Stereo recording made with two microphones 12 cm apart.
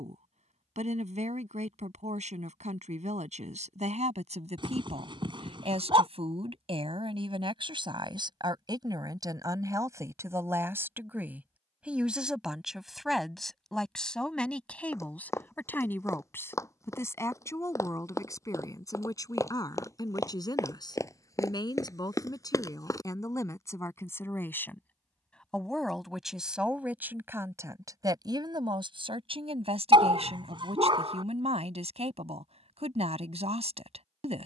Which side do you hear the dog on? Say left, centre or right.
right.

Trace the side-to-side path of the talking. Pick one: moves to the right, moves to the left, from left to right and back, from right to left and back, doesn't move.
from right to left and back.